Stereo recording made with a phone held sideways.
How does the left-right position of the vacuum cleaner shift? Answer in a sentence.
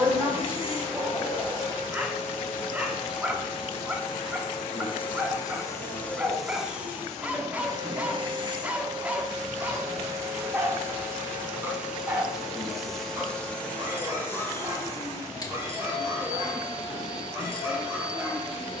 You can hear the vacuum cleaner move from left to right and back again.